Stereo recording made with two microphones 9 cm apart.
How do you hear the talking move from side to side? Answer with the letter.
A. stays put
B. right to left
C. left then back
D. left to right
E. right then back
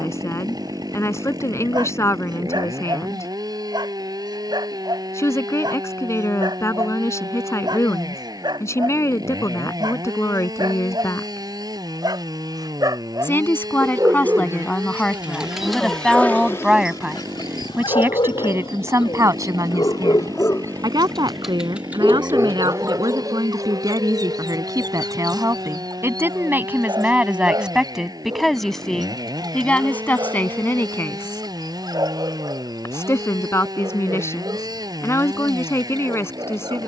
E.